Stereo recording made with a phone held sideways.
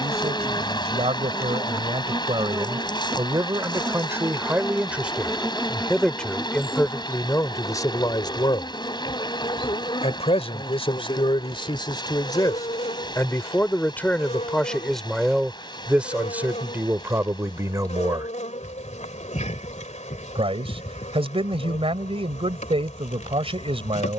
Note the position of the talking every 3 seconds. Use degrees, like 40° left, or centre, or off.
30° right, 10° right, 20° left, 30° left, 10° left, 10° right, 30° right, 30° right.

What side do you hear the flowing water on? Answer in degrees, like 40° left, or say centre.
30° left.